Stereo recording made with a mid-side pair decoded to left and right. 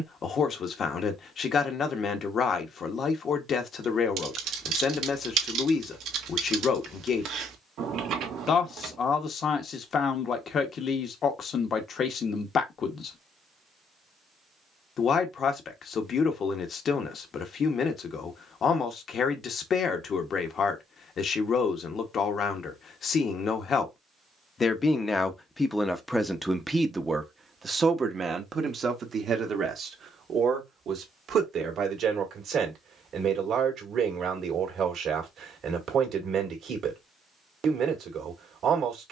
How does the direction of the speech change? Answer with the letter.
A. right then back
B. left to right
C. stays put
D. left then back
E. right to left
B.